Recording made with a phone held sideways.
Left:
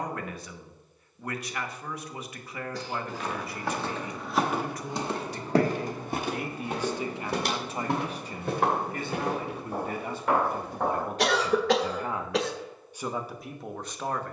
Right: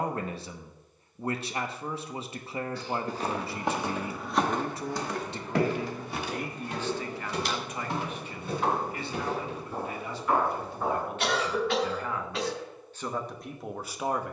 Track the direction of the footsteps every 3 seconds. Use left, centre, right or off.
off, centre, left, left, off.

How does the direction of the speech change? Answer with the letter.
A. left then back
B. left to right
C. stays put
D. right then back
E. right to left
A.